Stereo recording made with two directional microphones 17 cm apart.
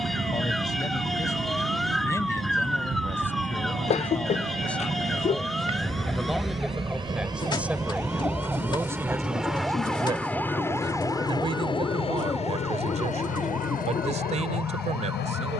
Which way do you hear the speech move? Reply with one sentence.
You can hear the speech move to the right.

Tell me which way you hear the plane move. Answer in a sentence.
You can hear the plane move from right to left.